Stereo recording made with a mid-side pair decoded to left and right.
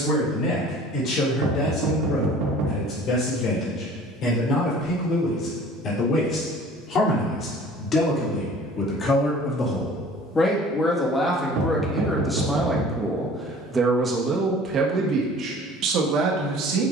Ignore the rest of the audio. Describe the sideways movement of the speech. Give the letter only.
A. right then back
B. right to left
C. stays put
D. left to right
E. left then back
D.